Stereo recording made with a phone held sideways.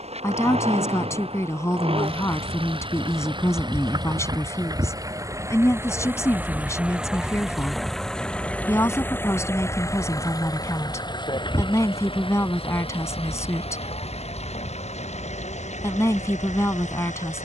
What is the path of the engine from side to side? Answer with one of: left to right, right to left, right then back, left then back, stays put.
right to left.